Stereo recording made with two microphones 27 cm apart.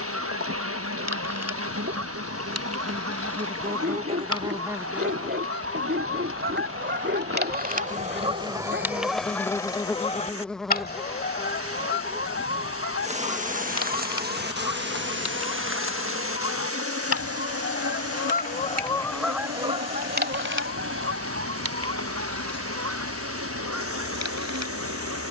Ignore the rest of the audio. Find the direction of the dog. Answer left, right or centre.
right.